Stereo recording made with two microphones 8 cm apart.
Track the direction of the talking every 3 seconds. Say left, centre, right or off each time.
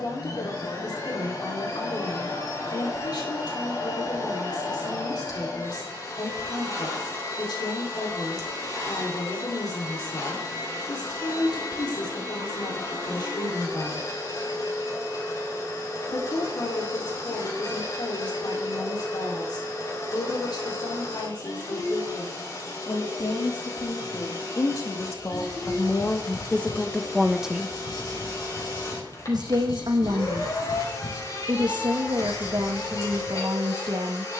left, left, left, left, left, left, left, left, left, right, right, right.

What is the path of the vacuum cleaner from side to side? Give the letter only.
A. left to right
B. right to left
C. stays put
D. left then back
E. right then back
C.